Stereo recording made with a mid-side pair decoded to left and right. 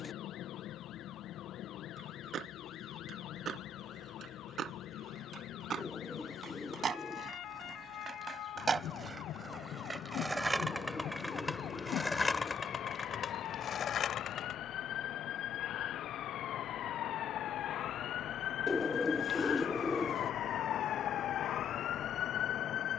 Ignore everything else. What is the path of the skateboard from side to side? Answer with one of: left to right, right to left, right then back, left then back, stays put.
right to left.